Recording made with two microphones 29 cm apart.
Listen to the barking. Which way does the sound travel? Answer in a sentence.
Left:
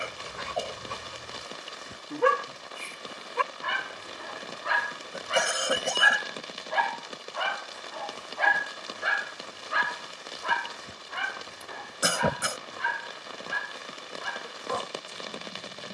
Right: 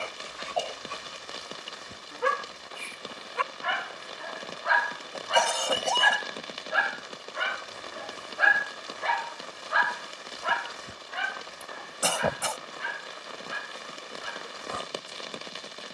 You can hear the barking move from left to right and back again.